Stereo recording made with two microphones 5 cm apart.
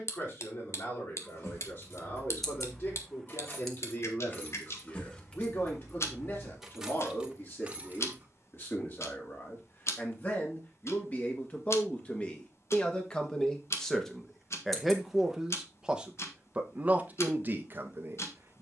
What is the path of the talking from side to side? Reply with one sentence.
You can hear the talking go from the left side to the right.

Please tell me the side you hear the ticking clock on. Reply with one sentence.
You can hear the ticking clock on the left.